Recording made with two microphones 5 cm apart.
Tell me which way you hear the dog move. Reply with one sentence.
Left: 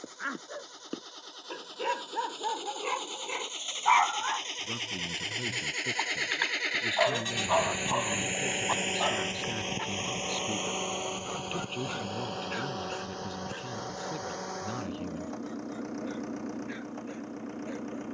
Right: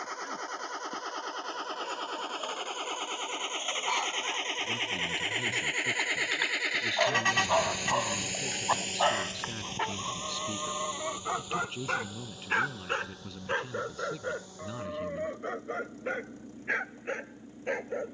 You can hear the dog move to the right.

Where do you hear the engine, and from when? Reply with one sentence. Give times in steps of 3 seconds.
You can hear the engine on the right from 0 s, in the centre from 6 s and on the left from 9 s.